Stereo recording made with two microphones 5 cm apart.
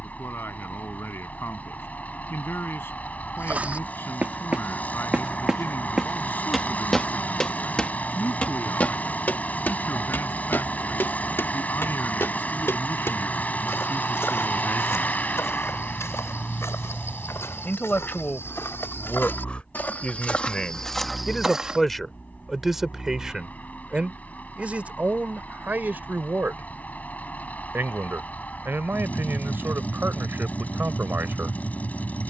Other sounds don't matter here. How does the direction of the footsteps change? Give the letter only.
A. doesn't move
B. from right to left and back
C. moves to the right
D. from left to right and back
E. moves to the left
B.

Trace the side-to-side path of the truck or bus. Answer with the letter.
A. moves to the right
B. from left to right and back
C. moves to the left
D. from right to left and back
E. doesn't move
E.